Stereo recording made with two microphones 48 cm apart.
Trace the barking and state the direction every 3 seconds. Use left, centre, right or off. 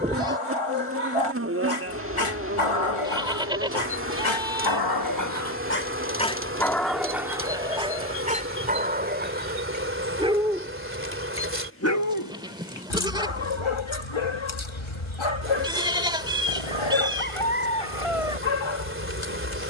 left, left, centre, centre, left, left, left.